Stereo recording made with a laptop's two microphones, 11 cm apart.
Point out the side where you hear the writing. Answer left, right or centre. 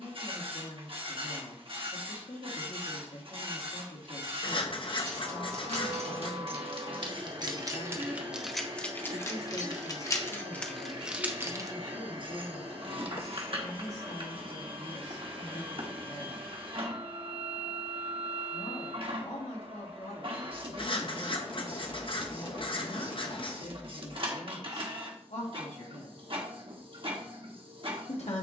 left.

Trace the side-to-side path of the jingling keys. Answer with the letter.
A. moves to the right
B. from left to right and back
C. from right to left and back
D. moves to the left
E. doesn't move
C.